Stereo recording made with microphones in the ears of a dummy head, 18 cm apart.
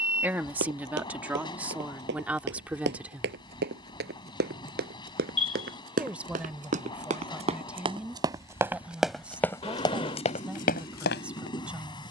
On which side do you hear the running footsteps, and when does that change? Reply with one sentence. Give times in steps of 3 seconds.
In this clip you hear the running footsteps on the right from 0 s and on the left from 9 s.